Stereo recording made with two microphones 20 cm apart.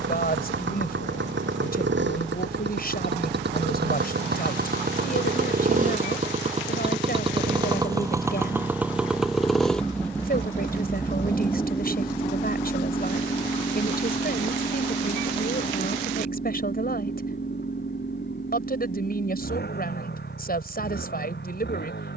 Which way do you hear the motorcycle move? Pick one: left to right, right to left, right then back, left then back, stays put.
right to left.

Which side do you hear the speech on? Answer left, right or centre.
left.